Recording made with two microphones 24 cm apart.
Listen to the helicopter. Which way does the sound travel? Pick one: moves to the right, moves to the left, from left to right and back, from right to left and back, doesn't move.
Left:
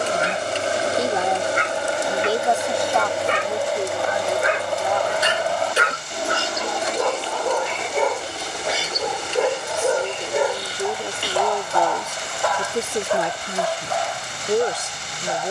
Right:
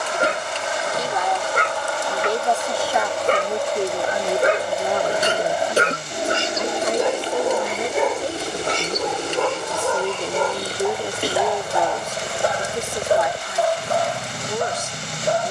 moves to the right.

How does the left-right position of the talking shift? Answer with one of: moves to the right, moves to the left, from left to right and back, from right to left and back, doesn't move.
from left to right and back.